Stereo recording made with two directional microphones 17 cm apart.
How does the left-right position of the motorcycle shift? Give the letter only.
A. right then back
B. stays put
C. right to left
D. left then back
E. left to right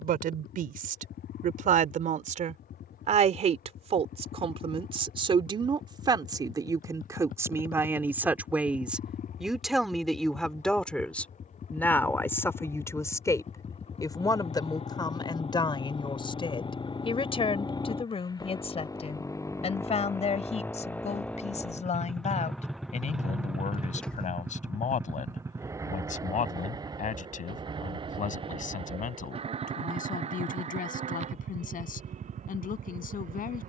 E.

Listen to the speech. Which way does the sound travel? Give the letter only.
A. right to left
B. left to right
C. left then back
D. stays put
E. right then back
A.